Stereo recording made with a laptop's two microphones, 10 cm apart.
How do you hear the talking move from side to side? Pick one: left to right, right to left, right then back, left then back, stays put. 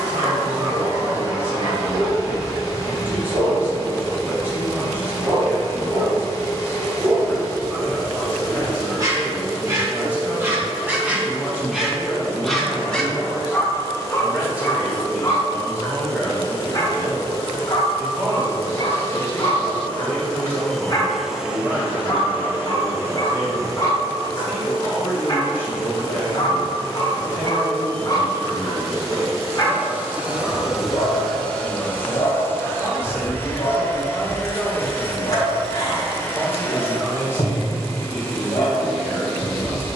stays put.